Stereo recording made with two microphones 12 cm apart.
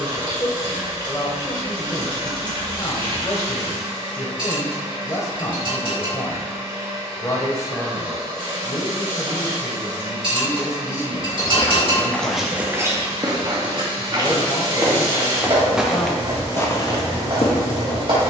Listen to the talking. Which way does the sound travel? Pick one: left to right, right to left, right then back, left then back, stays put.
stays put.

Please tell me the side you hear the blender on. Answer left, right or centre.
right.